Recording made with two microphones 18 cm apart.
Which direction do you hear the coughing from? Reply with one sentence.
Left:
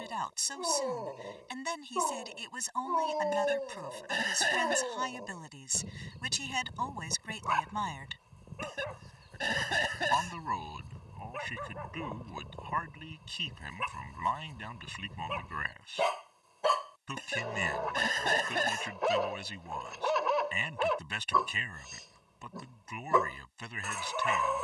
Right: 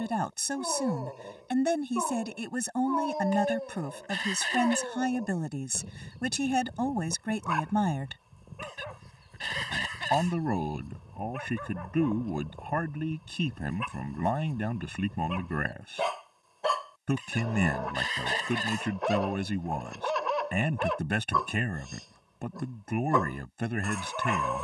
You can hear the coughing on the left.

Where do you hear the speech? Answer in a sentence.
You can hear the speech on the right.